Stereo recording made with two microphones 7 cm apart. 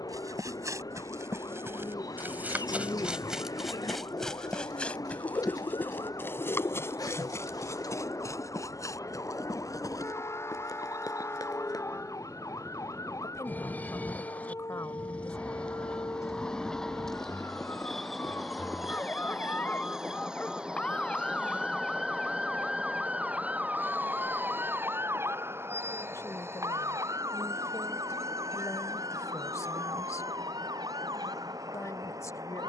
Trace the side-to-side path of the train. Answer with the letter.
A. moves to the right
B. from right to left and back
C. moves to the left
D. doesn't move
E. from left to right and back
A.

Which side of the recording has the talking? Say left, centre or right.
left.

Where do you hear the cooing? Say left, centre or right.
left.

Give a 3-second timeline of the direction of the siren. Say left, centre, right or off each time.
left, left, left, left, left, left, left, centre, right, right, right.